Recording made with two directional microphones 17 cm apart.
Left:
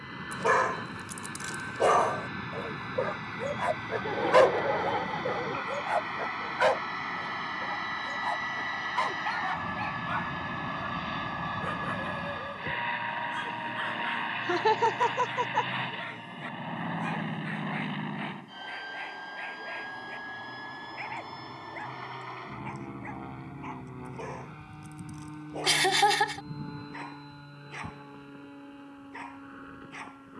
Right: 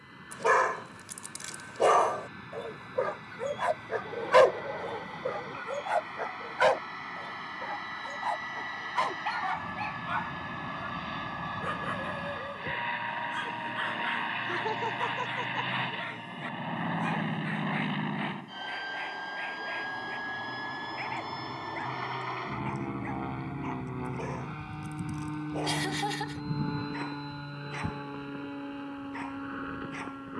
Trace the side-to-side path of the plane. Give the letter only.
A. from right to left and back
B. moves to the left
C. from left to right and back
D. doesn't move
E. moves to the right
E.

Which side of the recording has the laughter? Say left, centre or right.
left.